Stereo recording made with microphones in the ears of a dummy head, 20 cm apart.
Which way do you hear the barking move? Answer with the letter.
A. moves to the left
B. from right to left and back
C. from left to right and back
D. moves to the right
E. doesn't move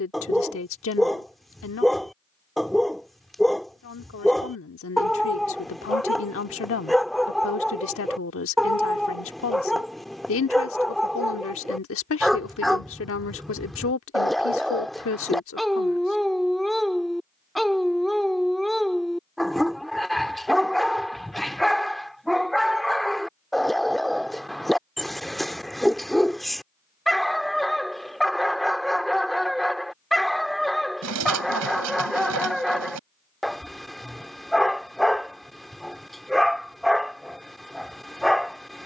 E.